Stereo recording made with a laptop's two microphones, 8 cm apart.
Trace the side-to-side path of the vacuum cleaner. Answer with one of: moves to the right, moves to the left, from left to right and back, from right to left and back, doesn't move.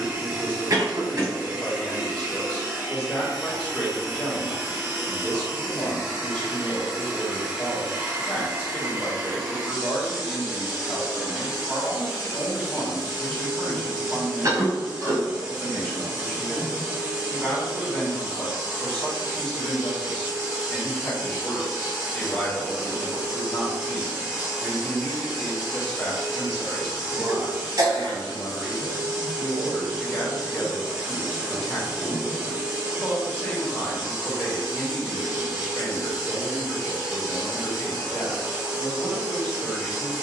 doesn't move.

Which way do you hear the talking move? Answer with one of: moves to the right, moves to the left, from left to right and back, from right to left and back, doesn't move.
doesn't move.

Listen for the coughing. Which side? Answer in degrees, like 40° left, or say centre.
40° right.